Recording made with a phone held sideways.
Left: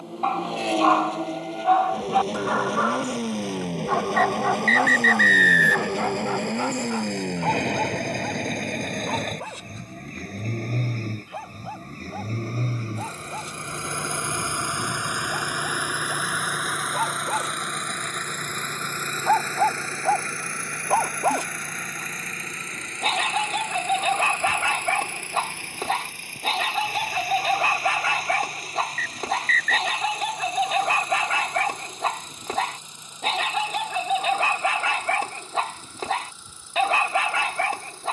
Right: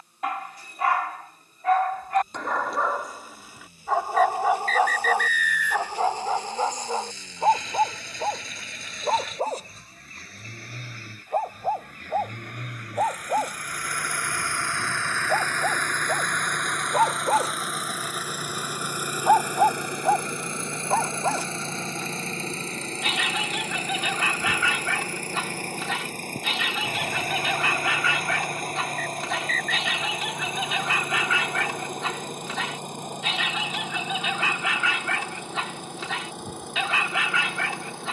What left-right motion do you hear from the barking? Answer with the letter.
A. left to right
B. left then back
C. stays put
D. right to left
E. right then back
E.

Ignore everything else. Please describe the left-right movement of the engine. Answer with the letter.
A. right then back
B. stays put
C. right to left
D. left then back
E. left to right
E.